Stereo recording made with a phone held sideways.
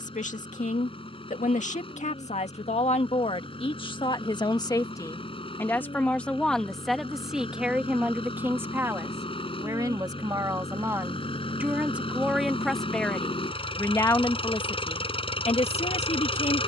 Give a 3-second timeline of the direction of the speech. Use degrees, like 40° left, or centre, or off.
50° left, 30° left, centre, 20° right, 10° left, 50° left.